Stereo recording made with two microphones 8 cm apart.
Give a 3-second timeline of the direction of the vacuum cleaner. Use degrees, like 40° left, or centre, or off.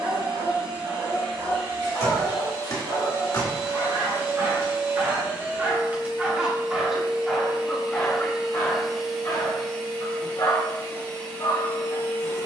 50° right, 40° right, 10° right, 20° left.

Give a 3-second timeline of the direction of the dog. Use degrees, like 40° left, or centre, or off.
50° right, 40° right, 10° left, 50° left.